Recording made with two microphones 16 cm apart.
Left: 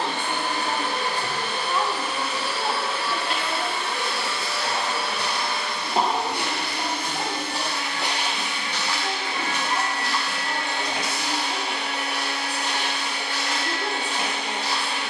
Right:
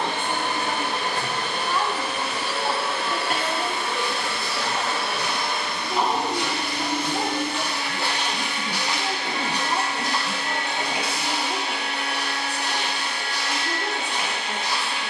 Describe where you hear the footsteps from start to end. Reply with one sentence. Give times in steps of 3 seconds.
In this clip you hear the footsteps not at all from 0 s, on the left from 3 s and on the right from 9 s.